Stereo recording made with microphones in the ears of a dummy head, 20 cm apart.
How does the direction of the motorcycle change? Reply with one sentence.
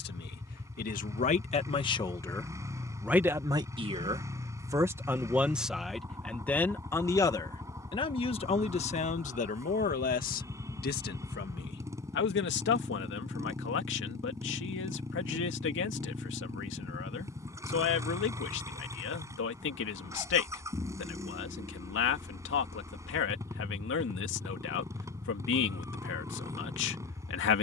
In this clip you hear the motorcycle stay in one place.